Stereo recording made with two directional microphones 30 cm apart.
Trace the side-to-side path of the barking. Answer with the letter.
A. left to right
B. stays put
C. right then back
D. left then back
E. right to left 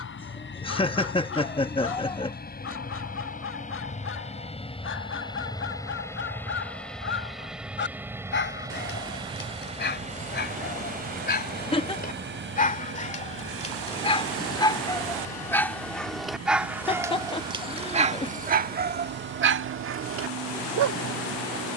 A.